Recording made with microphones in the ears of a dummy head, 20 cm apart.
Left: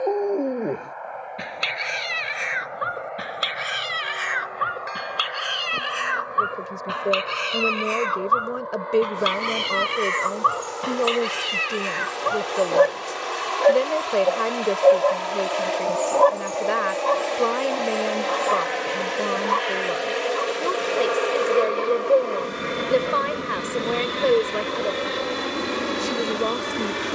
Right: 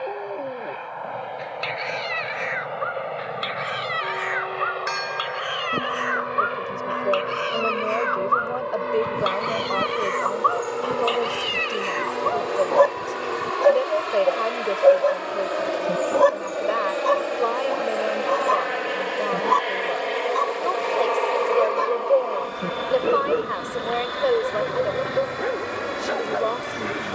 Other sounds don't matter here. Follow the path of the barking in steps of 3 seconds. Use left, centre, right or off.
left, left, left, left, centre, right, right, right, right.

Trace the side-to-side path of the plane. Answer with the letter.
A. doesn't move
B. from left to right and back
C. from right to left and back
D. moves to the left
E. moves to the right
D.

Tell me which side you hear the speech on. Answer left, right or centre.
left.